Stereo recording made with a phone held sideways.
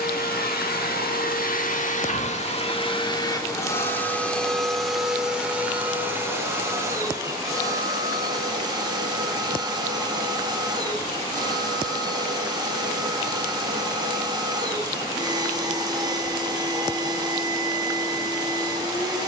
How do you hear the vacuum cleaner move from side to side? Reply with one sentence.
You can hear the vacuum cleaner go from the left side to the right.